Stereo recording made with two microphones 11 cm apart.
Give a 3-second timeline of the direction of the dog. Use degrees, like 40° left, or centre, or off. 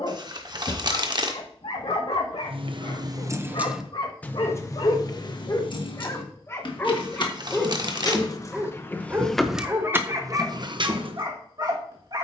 70° left, 50° left, 10° left, 30° right.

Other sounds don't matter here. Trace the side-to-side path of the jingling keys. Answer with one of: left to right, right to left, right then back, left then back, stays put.
left then back.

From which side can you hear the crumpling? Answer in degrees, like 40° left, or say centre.
40° right.